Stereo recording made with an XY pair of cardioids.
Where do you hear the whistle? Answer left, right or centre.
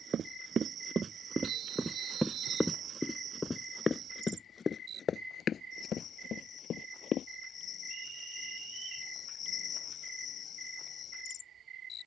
right.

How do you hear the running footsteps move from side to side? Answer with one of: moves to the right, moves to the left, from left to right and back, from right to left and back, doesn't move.
moves to the left.